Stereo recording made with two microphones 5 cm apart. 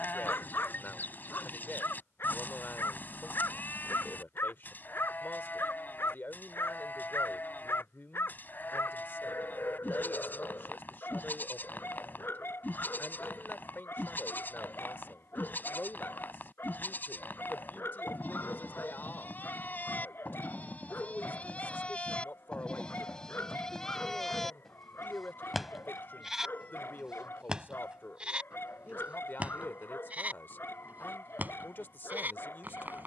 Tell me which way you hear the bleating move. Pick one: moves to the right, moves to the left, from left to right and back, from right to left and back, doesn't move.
moves to the right.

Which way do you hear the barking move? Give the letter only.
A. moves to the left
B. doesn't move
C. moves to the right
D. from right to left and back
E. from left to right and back
B.